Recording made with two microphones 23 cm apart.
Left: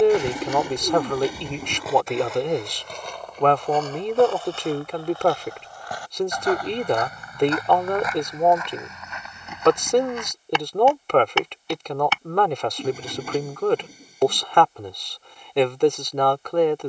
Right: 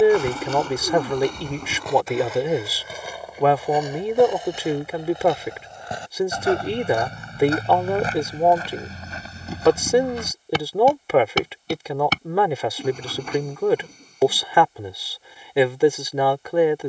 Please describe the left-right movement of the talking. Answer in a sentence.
In this clip you hear the talking stay put.